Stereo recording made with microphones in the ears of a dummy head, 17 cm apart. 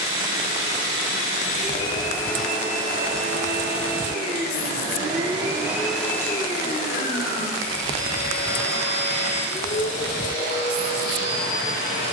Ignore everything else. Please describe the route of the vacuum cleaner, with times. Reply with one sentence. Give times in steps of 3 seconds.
In this clip you hear the vacuum cleaner on the left from 0 s, on the right from 3 s and on the left from 6 s.